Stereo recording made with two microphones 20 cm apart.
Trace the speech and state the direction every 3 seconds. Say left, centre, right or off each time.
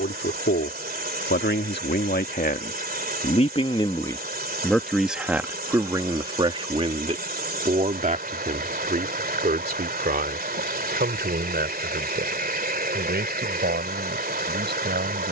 left, centre, right, right, right.